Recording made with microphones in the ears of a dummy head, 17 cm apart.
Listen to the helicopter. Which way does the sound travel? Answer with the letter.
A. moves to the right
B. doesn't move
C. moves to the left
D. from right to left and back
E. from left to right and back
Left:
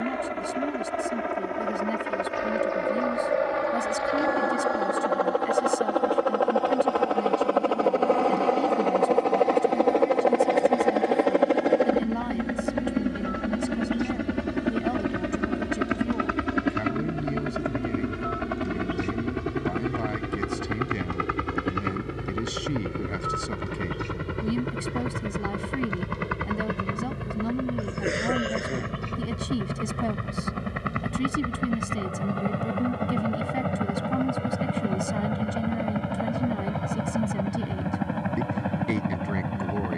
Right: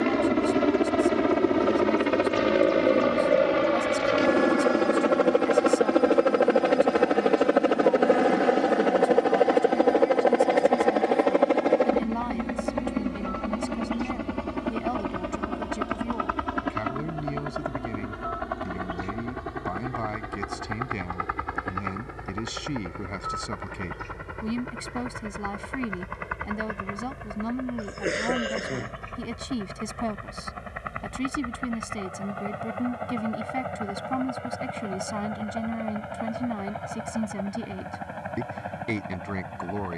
C.